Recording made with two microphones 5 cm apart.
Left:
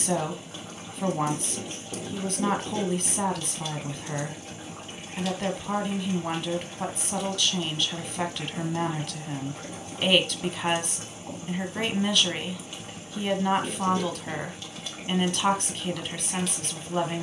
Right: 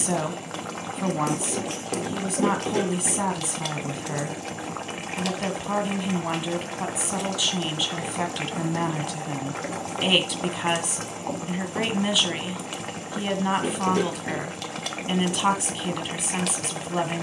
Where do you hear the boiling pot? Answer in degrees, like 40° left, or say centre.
80° right.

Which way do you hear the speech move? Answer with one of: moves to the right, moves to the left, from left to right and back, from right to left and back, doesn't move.
doesn't move.